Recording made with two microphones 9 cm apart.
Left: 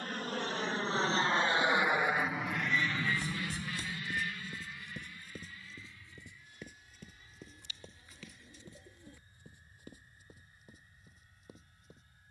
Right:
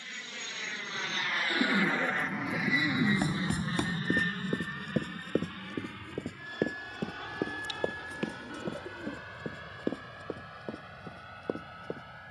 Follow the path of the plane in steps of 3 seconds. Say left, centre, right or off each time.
left, right, right, right.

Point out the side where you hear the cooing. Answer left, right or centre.
right.